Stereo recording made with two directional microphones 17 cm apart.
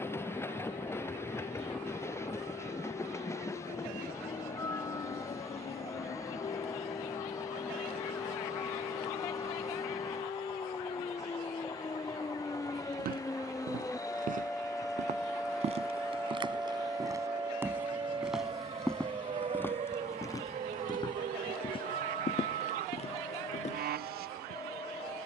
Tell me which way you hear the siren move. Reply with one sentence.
You can hear the siren travel towards the right.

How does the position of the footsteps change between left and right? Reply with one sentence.
You can hear the footsteps go from the right side to the left.